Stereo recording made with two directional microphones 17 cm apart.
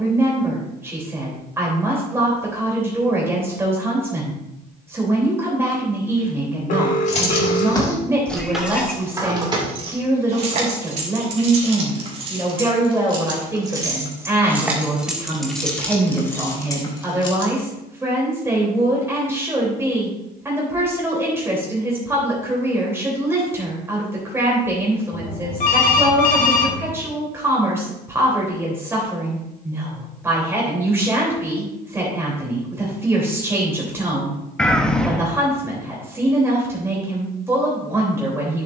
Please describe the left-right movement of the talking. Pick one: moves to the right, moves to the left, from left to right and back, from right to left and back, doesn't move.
doesn't move.